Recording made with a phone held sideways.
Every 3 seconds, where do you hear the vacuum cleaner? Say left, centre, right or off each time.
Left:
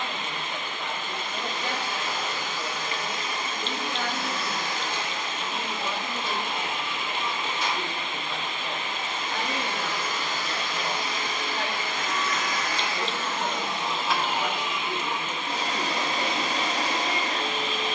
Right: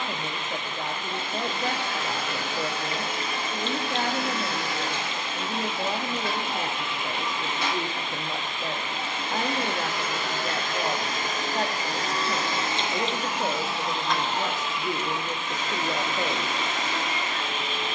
right, right, right, right, centre, left.